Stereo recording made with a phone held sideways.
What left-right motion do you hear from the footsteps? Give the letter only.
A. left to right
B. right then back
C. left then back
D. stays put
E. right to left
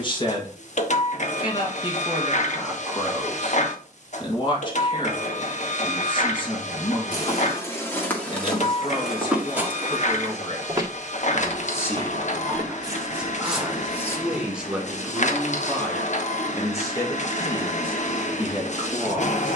B.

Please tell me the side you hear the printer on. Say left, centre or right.
left.